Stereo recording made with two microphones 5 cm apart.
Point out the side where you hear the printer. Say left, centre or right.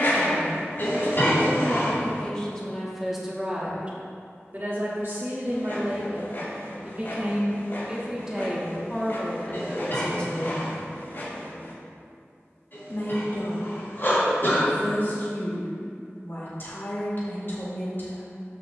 left.